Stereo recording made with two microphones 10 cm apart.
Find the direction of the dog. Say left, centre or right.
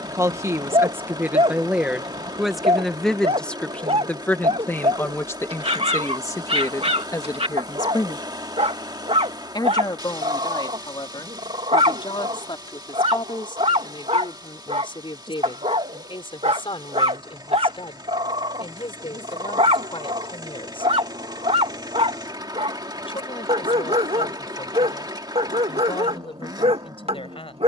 right.